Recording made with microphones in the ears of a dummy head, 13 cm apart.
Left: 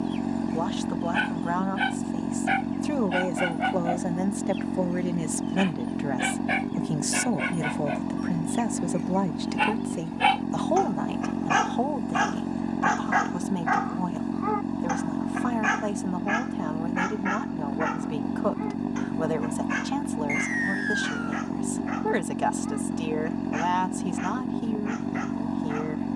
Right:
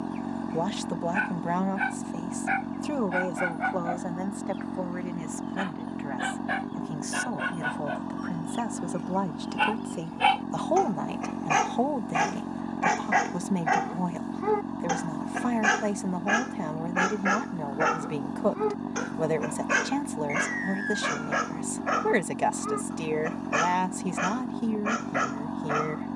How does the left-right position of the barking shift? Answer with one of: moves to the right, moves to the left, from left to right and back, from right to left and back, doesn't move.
moves to the right.